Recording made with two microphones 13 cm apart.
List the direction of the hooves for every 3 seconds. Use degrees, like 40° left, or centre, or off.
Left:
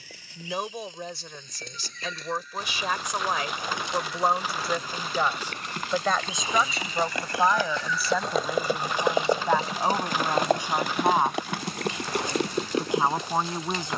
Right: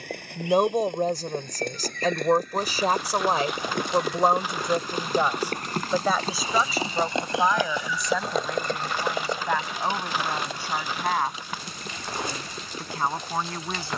60° right, 50° right, 20° right, 50° left, 70° left.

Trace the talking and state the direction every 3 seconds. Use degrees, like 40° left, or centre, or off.
40° right, 20° right, centre, 10° left, 20° left.